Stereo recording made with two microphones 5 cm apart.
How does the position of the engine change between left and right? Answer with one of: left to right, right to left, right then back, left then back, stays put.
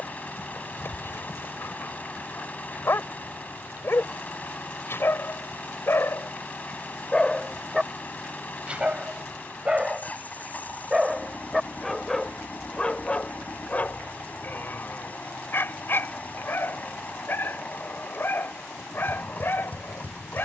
stays put.